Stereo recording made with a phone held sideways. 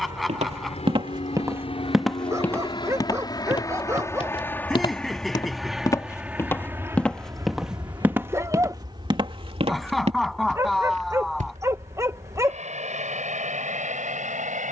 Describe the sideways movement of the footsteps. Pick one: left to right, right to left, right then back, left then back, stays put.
left then back.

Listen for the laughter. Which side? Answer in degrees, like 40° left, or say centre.
centre.